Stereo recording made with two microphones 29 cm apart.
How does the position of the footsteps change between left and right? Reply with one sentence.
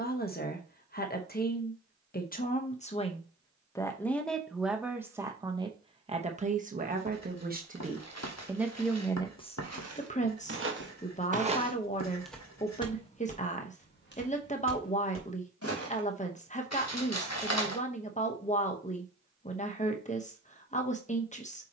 In this clip you hear the footsteps move to the left.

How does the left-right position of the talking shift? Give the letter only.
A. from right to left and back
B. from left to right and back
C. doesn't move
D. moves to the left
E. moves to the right
B.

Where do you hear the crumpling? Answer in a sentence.
In this clip you hear the crumpling on the left.